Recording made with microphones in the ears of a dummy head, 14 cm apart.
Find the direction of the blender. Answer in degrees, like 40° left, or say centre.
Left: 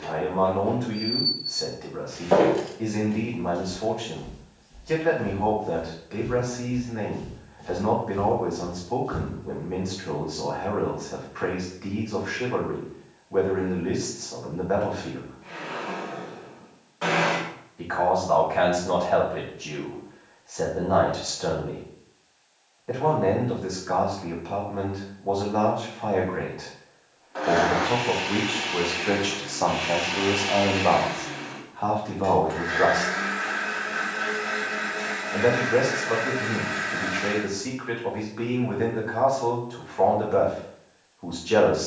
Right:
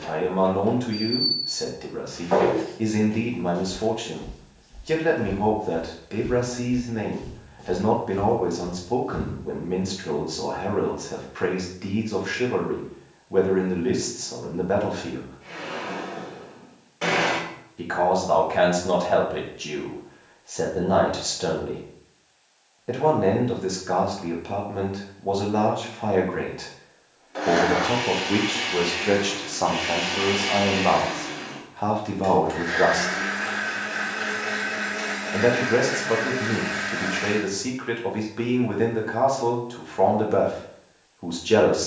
30° right.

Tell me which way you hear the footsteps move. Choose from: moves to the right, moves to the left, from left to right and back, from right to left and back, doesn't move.
from left to right and back.